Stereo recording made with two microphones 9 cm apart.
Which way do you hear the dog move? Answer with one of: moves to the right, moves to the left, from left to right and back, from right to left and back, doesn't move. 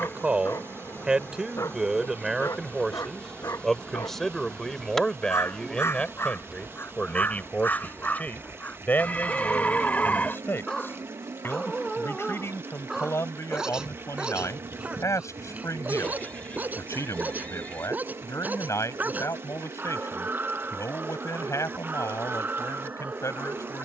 moves to the right.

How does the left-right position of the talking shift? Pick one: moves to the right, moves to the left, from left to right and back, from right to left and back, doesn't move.
moves to the left.